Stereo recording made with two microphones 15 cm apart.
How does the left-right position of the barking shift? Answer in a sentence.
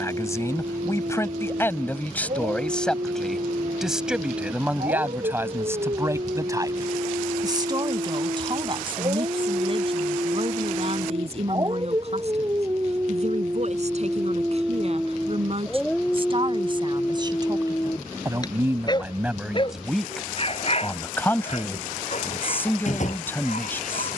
You can hear the barking move to the left.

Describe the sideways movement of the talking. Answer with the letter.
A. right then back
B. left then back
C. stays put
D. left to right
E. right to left
A.